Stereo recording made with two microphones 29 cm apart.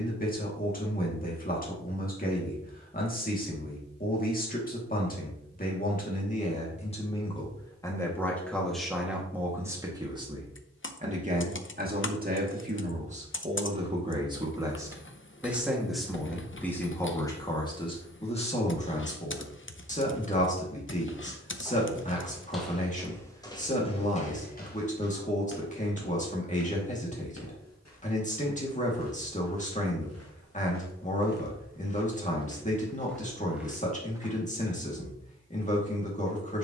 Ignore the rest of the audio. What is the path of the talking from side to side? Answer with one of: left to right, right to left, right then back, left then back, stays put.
right then back.